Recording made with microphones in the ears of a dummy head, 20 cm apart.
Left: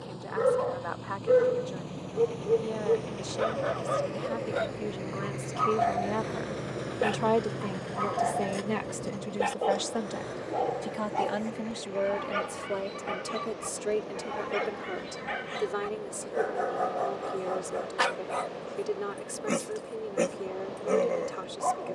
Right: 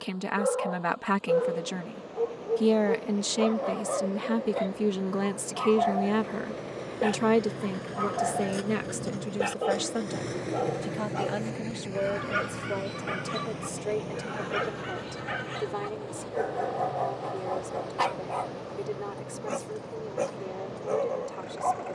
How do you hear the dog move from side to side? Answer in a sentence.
You can hear the dog move from left to right and back again.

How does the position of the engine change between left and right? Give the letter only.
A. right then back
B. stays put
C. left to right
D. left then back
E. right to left
C.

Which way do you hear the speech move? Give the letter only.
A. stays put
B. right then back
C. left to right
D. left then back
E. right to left
E.